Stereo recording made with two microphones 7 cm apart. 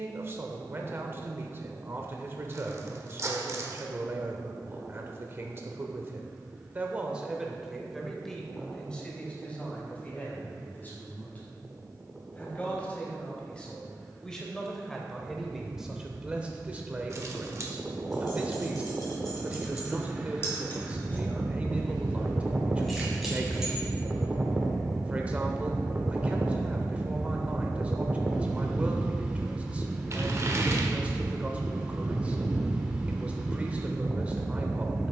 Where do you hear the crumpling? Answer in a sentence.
In this clip you hear the crumpling on the right.